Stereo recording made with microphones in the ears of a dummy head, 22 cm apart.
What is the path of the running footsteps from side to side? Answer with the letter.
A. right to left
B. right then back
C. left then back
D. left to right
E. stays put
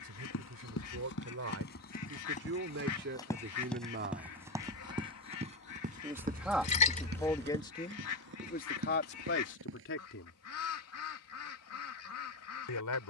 D.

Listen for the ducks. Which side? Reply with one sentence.
In this clip you hear the ducks on the left.